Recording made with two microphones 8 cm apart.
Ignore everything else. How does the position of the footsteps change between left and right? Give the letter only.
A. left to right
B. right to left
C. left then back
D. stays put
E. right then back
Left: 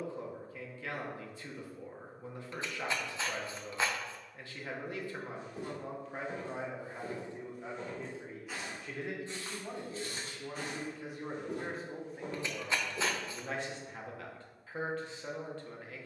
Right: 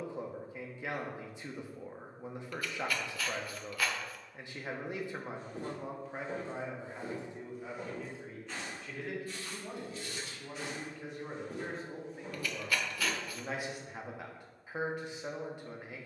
B.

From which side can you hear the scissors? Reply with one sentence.
You can hear the scissors on the left.